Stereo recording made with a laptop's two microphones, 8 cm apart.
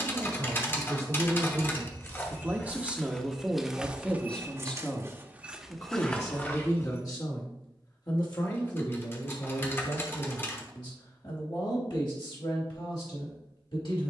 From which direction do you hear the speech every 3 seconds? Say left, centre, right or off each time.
right, centre, left, left, left.